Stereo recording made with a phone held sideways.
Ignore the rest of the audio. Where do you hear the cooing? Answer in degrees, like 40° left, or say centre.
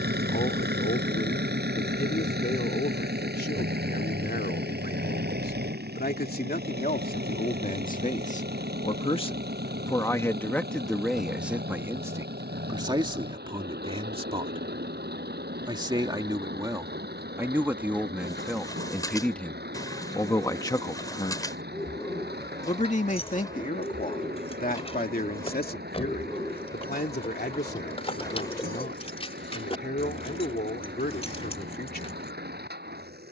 20° left.